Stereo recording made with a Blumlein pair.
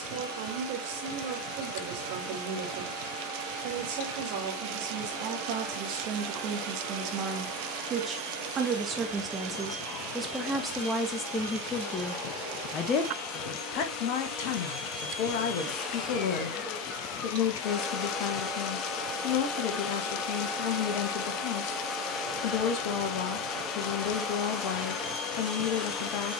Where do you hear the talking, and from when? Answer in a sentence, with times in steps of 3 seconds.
You can hear the talking on the right from 0 s, in the centre from 9 s and on the left from 12 s.